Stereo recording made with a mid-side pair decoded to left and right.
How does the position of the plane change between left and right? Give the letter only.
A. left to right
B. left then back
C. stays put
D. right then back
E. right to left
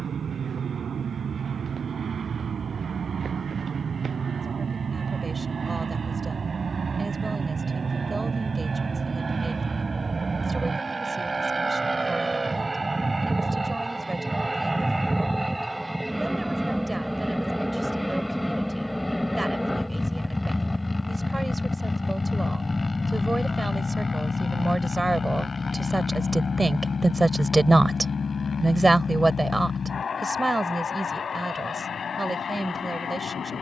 E.